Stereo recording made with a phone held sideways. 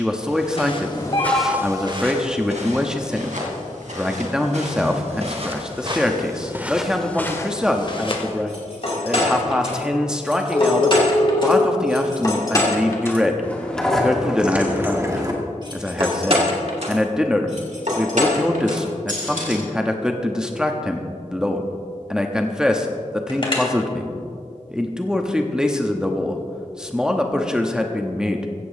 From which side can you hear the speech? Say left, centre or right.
centre.